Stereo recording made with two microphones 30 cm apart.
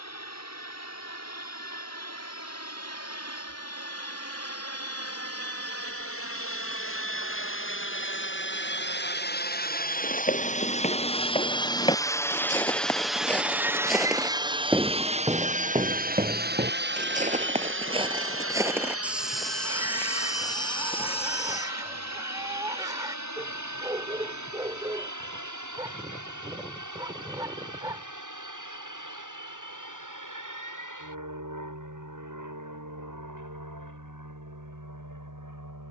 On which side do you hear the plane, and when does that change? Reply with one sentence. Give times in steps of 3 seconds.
In this clip you hear the plane on the left from 0 s, in the centre from 12 s and on the right from 15 s.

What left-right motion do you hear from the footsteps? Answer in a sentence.
In this clip you hear the footsteps go right and come back.